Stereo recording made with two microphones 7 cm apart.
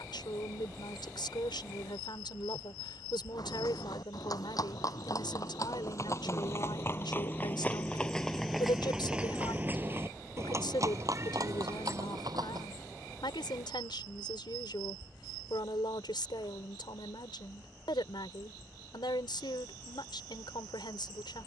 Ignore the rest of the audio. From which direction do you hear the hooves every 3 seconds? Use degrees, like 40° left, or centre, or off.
off, 50° left, 20° left, 40° right, 60° right, off, off.